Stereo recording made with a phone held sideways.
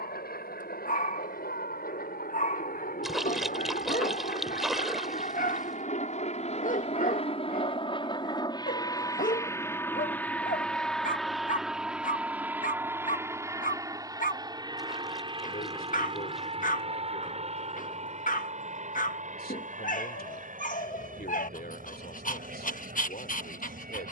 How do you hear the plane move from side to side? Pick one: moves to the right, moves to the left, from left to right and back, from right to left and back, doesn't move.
moves to the right.